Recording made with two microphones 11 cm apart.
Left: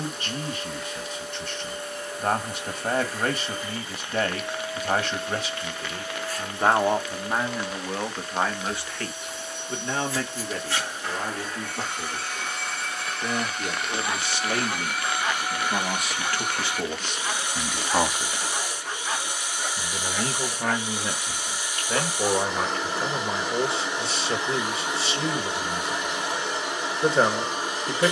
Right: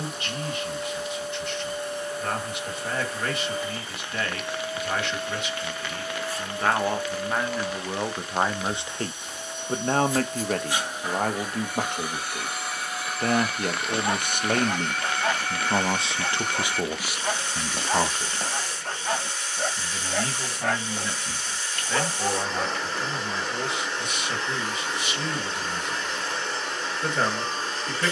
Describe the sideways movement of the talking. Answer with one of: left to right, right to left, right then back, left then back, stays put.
right then back.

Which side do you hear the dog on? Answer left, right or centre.
right.